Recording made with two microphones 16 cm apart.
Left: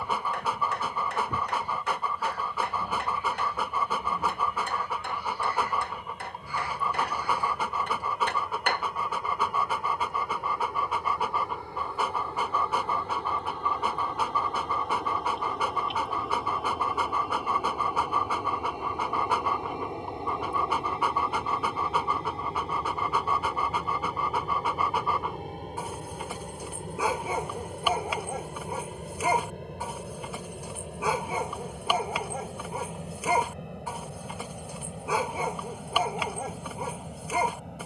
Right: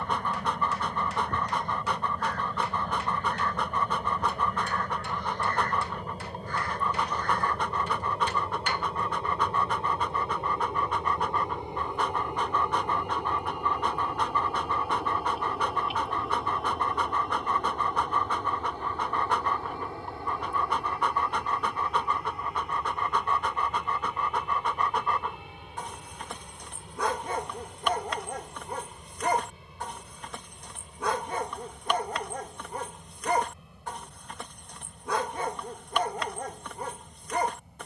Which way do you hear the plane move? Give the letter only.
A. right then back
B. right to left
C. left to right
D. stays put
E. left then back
B.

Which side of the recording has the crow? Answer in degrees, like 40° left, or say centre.
10° left.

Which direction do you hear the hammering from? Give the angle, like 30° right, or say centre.
60° left.